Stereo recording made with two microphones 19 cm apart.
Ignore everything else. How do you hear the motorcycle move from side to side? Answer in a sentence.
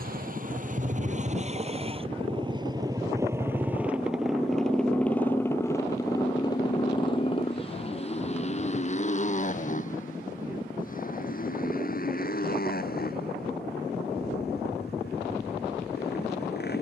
In this clip you hear the motorcycle move from right to left.